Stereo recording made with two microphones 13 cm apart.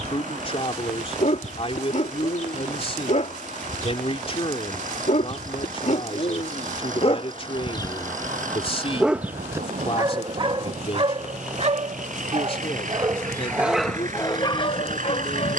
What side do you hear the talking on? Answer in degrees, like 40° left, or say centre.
50° left.